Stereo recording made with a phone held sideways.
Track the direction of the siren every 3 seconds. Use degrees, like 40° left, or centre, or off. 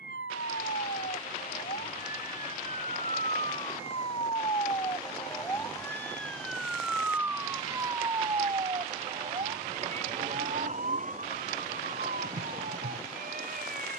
60° left, 30° left, 20° right, 50° right, 60° right.